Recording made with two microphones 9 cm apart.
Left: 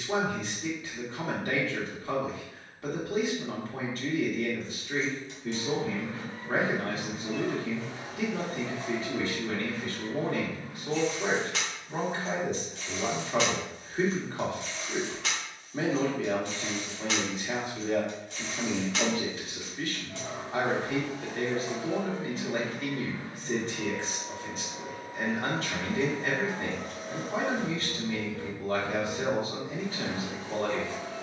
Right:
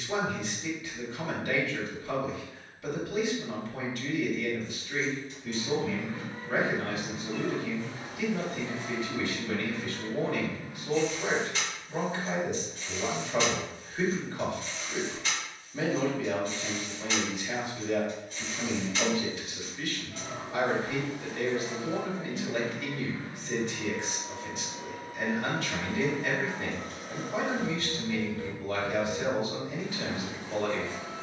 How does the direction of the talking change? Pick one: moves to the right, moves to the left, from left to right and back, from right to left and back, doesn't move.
doesn't move.